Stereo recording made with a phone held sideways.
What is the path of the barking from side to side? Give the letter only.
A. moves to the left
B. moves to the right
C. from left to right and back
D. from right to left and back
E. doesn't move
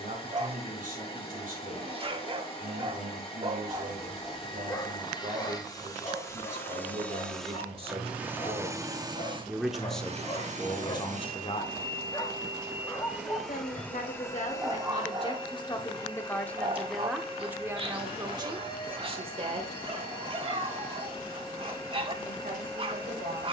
D.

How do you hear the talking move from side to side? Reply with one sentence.
In this clip you hear the talking move from right to left and back again.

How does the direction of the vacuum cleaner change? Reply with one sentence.
In this clip you hear the vacuum cleaner go right and come back.